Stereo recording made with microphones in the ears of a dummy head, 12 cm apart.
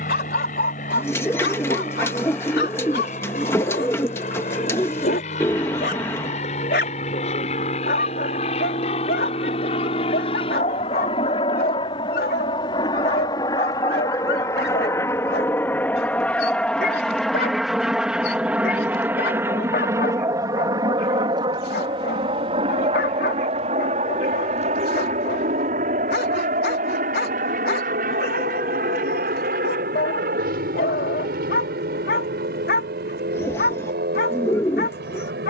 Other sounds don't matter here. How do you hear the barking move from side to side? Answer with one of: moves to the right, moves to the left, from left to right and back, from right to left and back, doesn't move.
doesn't move.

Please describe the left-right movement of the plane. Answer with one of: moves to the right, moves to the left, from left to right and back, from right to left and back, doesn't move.
moves to the right.